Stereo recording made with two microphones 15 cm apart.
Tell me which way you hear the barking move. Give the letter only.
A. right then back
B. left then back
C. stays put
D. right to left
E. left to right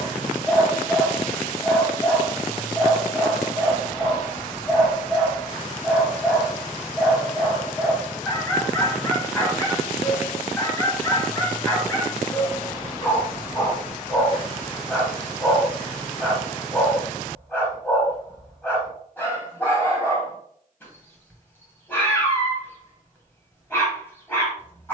C.